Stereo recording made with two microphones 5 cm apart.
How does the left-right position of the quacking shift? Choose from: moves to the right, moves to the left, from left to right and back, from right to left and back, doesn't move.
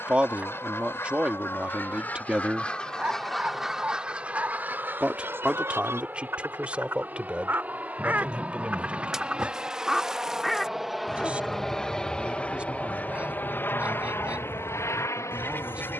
from left to right and back.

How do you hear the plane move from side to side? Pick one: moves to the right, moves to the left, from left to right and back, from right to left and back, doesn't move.
moves to the left.